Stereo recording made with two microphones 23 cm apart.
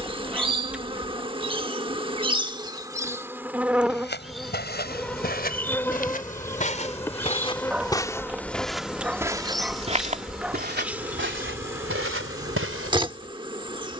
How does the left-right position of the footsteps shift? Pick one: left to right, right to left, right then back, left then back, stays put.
left to right.